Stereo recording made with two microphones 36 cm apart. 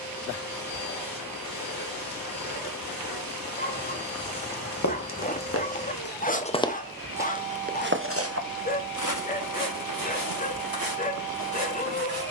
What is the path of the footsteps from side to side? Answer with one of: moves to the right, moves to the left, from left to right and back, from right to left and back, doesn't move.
moves to the right.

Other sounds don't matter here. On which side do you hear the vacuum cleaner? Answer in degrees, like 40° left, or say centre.
70° left.